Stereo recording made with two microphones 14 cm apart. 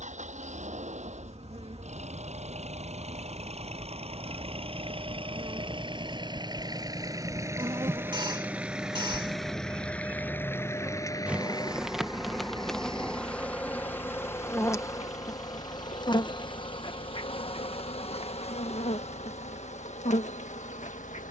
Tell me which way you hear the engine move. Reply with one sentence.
In this clip you hear the engine travel towards the left.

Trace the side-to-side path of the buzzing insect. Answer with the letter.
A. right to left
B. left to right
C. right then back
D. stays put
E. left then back
A.